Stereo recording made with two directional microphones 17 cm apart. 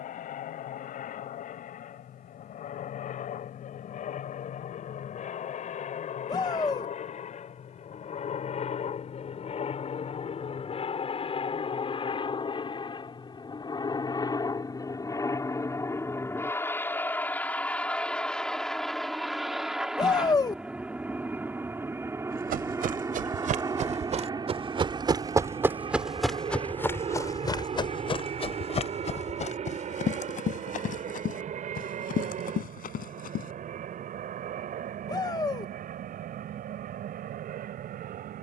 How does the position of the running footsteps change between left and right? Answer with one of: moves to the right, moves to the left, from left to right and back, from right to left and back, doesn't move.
moves to the left.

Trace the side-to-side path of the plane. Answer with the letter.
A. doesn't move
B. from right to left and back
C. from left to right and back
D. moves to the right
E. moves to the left
D.